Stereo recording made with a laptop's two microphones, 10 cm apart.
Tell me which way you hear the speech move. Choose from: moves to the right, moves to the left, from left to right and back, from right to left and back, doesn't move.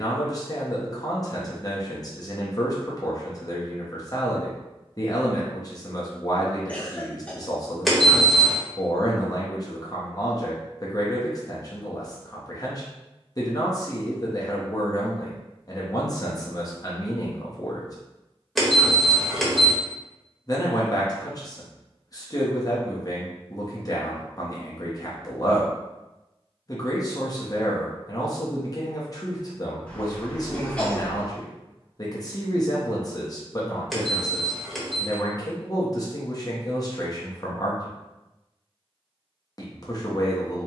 doesn't move.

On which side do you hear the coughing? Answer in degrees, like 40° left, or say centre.
10° left.